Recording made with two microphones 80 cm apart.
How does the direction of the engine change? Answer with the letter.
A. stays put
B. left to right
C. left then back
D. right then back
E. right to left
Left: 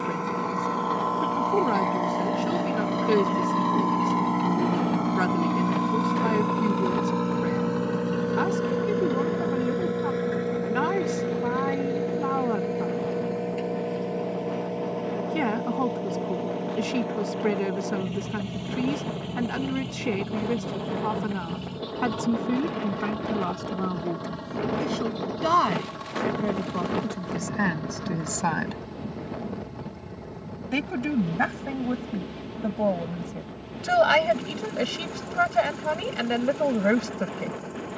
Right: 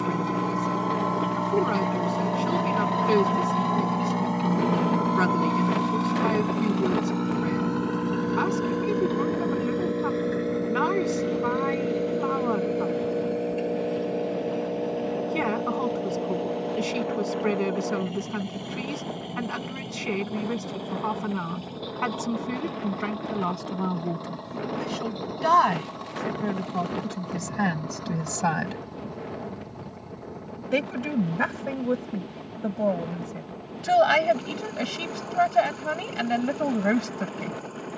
E.